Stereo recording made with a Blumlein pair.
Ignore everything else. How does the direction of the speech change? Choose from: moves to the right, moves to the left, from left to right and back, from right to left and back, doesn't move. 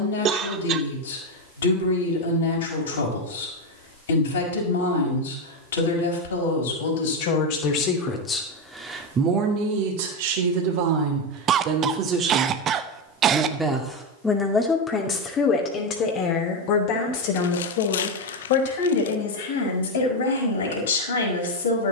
from left to right and back.